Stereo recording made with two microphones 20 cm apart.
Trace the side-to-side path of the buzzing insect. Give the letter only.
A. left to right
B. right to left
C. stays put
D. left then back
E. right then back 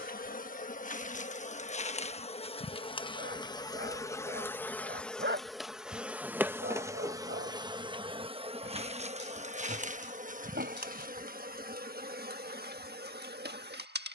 A.